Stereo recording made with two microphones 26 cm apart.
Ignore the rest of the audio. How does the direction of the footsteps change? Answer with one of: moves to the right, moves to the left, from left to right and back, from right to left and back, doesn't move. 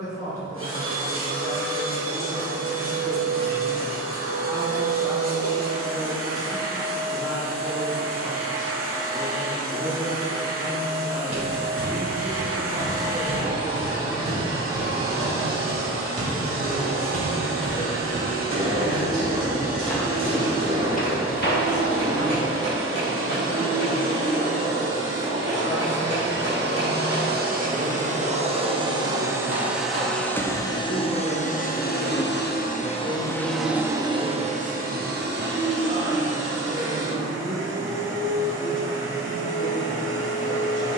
moves to the left.